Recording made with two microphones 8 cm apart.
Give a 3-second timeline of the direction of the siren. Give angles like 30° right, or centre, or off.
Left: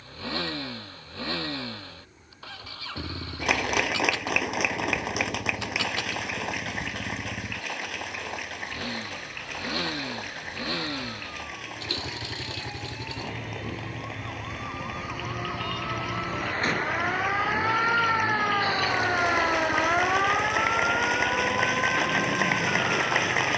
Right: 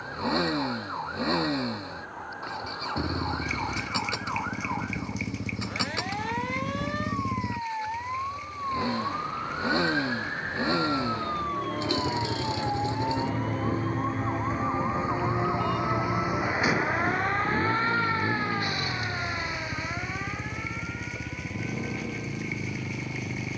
70° right, 70° right, 70° right, 60° right, 40° right, 10° right, 40° left, 60° left.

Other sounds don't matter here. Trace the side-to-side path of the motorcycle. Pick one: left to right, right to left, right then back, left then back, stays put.
stays put.